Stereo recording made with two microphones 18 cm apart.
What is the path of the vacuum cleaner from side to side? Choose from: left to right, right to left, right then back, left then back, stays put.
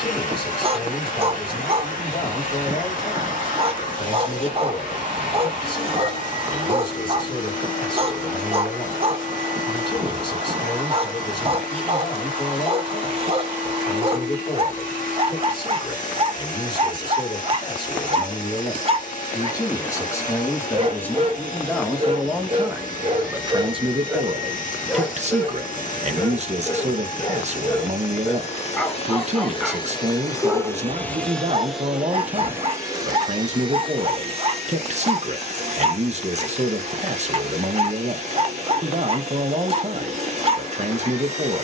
left to right.